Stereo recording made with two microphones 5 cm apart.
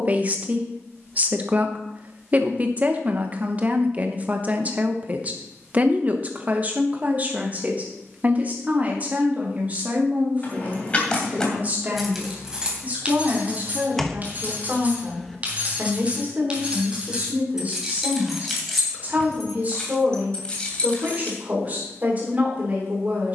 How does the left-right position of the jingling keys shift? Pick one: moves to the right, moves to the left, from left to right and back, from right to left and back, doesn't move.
from left to right and back.